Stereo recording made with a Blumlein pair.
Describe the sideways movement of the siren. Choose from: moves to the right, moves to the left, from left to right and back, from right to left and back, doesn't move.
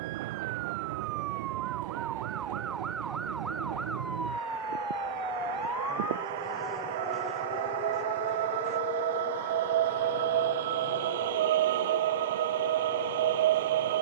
moves to the left.